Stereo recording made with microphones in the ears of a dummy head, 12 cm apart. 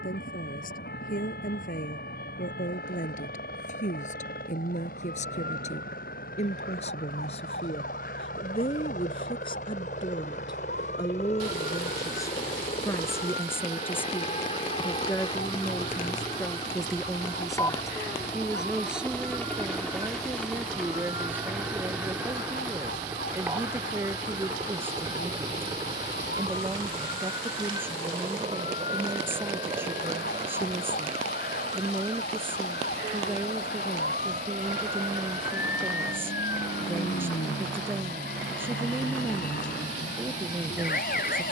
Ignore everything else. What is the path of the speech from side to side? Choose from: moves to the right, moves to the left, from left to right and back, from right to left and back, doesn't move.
moves to the right.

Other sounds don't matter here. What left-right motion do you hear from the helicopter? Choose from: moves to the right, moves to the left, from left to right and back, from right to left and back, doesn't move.
moves to the right.